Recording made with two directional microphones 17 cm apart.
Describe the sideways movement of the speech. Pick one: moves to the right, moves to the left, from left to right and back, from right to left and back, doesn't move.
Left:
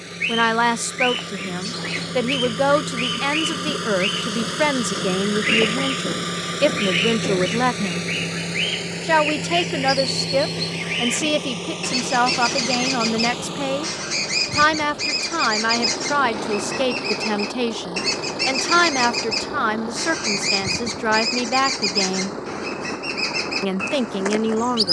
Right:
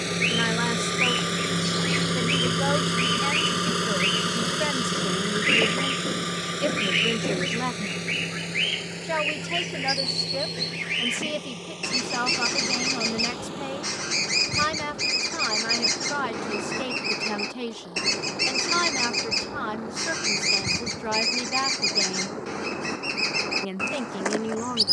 doesn't move.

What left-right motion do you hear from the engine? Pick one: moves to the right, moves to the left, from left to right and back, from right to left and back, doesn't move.
moves to the left.